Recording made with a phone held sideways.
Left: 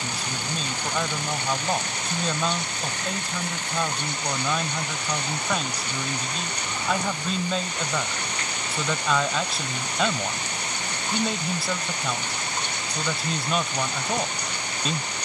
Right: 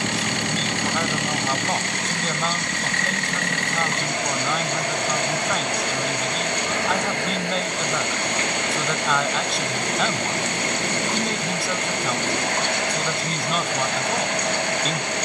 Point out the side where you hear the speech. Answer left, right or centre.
centre.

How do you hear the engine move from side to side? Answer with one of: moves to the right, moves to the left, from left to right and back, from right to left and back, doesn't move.
doesn't move.